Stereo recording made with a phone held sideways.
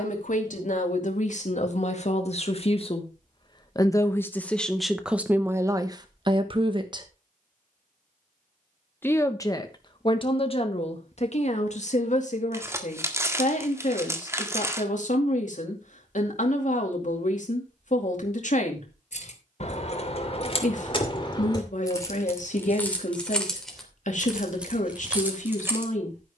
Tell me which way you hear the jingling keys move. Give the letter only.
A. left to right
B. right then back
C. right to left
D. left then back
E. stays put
A.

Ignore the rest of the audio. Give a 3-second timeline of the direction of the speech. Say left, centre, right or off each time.
left, centre, right, left, left, left, left, left, left.